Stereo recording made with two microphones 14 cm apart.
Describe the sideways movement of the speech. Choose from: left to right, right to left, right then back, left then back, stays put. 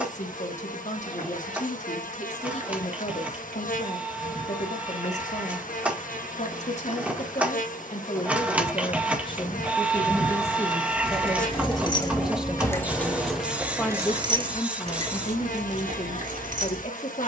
right then back.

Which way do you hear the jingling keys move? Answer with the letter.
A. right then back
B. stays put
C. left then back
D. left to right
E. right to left
D.